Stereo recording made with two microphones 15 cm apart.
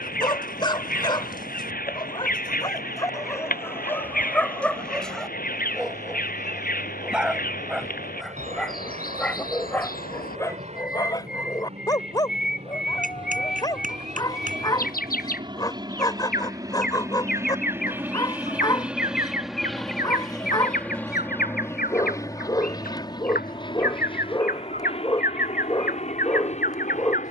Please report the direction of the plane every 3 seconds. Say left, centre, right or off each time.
right, right, right, right, right, right, centre, left, left.